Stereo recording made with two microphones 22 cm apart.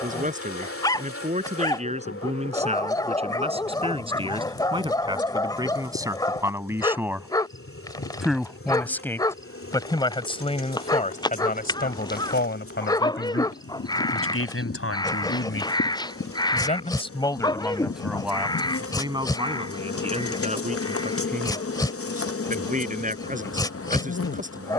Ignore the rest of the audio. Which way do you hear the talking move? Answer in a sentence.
You can hear the talking go left and come back.